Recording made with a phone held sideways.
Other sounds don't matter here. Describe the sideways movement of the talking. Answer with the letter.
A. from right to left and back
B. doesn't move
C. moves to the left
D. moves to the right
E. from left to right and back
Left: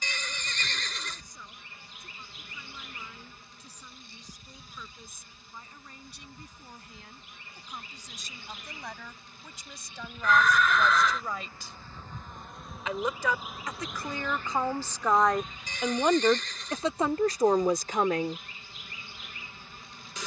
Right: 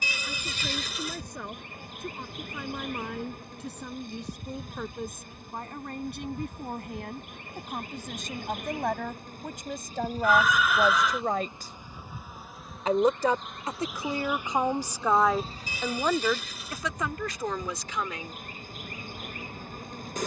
C.